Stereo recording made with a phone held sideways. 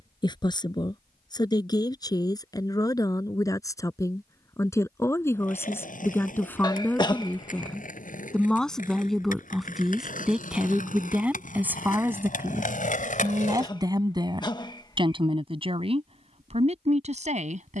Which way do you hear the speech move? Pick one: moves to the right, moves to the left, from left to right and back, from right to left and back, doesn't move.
moves to the right.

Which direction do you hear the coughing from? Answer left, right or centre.
left.